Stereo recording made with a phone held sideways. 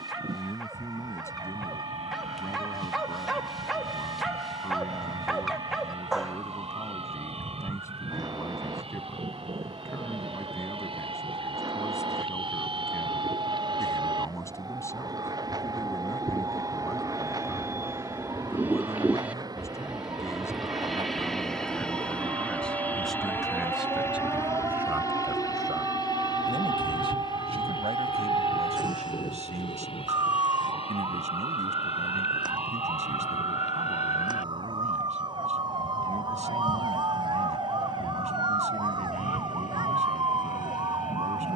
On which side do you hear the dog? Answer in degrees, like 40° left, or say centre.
centre.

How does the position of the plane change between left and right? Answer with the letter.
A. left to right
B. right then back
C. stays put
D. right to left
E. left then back
D.